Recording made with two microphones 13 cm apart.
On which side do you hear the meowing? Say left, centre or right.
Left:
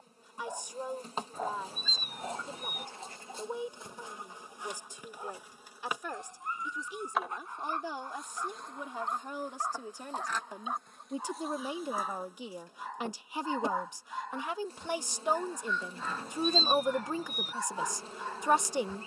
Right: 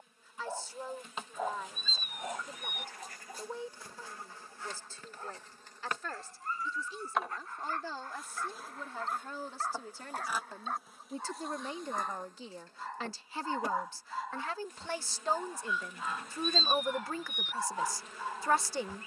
left.